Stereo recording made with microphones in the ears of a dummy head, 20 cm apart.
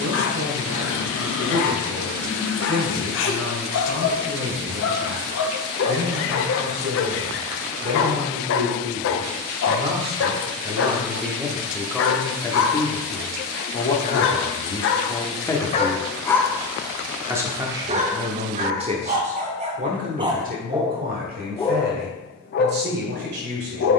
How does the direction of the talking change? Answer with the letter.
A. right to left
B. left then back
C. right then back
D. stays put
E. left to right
B.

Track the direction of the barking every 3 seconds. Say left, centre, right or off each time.
left, left, left, left, left, centre, right, left.